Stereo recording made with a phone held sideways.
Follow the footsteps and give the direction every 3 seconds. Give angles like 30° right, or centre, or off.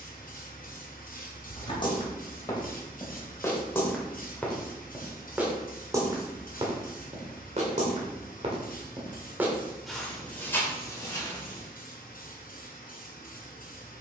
30° left, 10° left, 40° right, 10° left, off.